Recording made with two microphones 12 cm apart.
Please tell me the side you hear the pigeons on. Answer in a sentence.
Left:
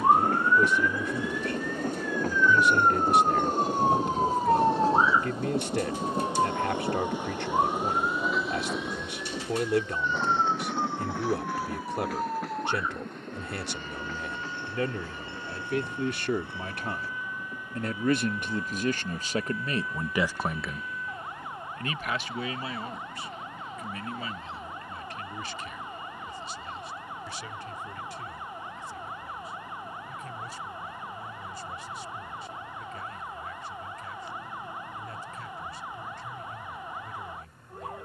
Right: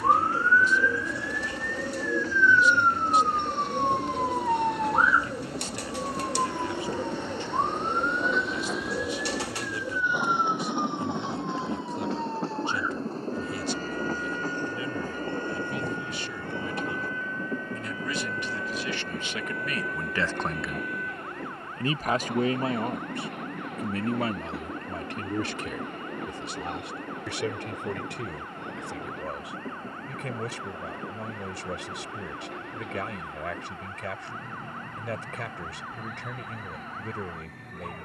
In this clip you hear the pigeons on the right.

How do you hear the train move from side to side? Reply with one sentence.
You can hear the train go from the left side to the right.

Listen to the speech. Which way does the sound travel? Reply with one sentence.
You can hear the speech travel towards the right.